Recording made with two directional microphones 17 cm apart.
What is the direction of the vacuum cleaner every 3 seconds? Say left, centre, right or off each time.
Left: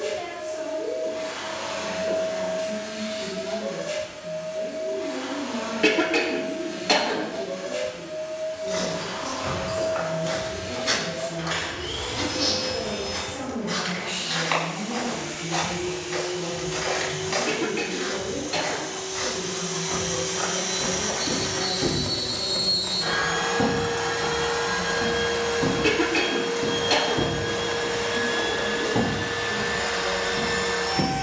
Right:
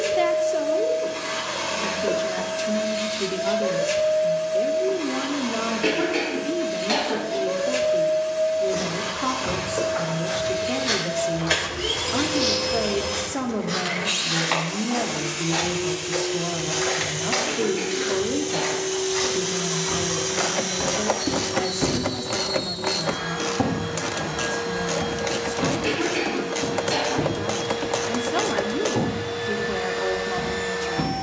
right, right, right, right, right, right, right, left, left, left, left.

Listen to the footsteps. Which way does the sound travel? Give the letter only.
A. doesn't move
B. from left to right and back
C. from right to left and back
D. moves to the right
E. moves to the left
B.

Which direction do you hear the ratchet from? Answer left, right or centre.
right.